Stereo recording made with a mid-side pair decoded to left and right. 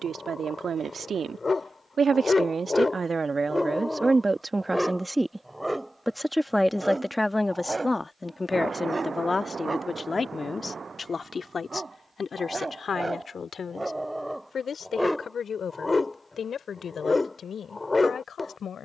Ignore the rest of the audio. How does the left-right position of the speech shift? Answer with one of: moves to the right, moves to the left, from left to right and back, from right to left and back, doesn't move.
moves to the left.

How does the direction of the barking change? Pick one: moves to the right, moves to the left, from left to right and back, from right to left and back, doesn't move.
from left to right and back.